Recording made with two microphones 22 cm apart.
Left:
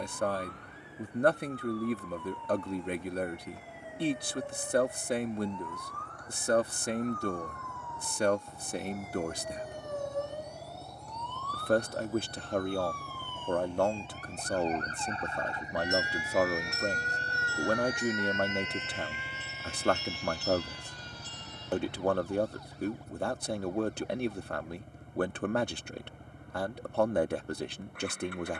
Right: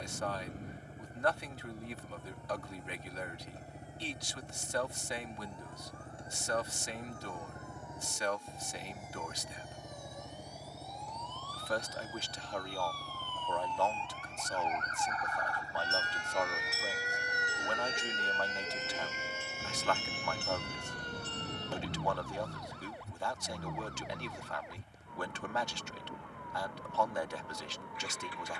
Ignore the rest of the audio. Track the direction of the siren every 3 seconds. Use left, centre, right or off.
left, left, left, left, left, centre, right, right, right, right.